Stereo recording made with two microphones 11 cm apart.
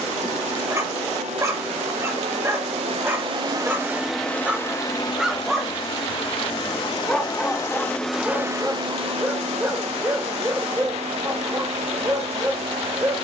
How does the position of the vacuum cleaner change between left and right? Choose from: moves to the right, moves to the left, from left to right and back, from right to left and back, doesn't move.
from right to left and back.